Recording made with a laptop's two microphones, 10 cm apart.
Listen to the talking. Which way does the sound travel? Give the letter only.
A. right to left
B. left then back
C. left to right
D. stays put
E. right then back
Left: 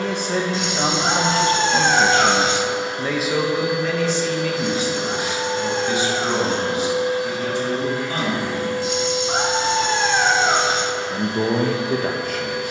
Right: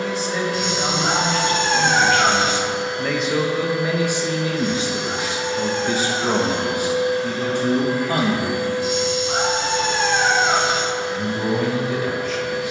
E.